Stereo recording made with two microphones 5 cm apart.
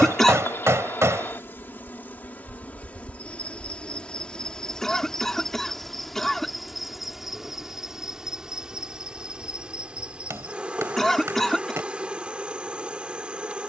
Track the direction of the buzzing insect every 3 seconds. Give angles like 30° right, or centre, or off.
40° left, 20° left, 10° right, 20° right, 20° right.